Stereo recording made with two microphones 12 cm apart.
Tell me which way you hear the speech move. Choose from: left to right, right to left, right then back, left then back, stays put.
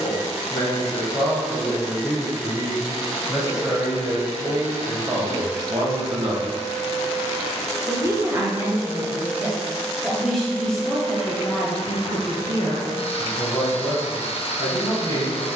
right then back.